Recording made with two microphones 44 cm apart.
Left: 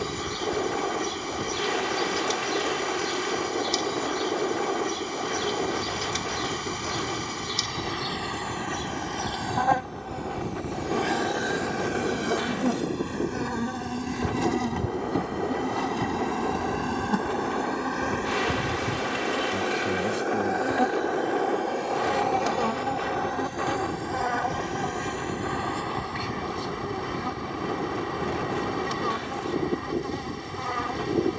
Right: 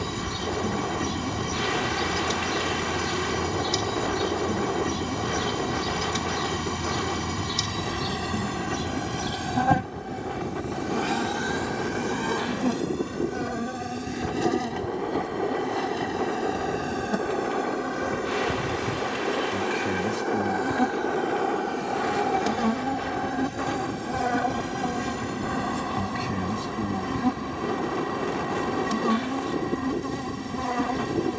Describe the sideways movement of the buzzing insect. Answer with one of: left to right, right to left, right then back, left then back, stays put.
left then back.